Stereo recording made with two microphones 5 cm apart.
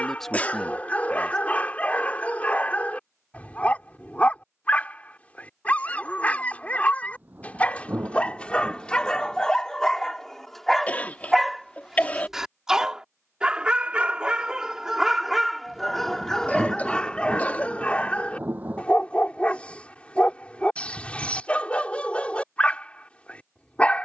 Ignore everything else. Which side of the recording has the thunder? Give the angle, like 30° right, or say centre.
30° right.